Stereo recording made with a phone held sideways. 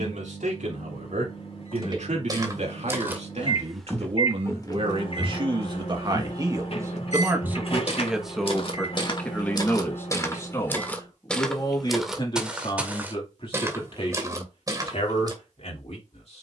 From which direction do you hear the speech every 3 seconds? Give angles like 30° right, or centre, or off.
70° right, 50° right, 10° right, 20° left, 40° left, 50° left.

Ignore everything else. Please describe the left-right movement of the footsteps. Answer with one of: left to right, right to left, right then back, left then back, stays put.
left then back.